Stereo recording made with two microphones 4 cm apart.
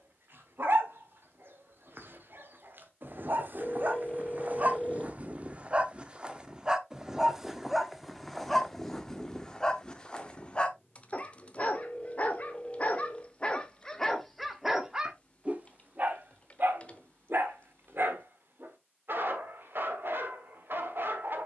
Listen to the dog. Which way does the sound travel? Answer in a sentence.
In this clip you hear the dog move from right to left and back again.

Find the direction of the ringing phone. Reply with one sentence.
In this clip you hear the ringing phone on the left.